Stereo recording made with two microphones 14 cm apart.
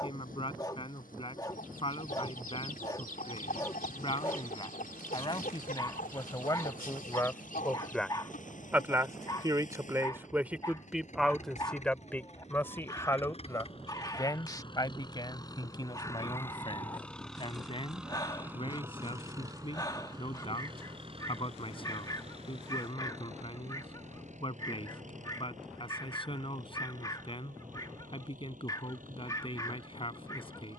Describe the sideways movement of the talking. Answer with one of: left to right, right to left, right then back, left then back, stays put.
right then back.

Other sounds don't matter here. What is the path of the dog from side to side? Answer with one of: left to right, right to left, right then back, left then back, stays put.
stays put.